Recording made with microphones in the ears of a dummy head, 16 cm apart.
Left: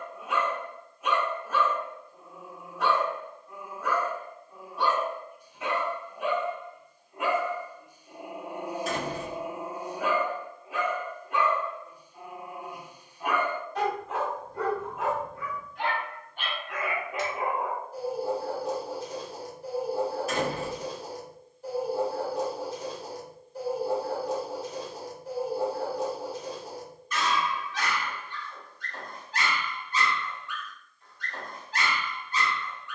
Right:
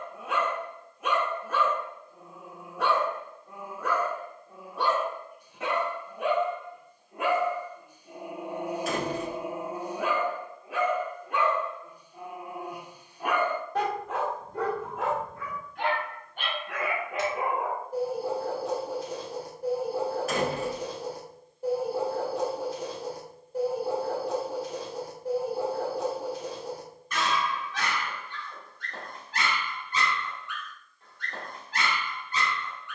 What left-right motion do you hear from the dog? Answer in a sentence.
You can hear the dog stay put.